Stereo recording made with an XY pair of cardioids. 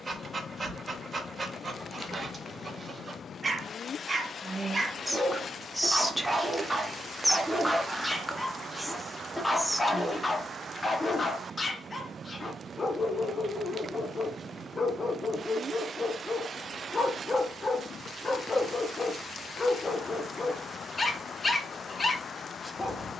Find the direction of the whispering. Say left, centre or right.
centre.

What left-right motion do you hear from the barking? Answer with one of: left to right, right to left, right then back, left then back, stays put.
right to left.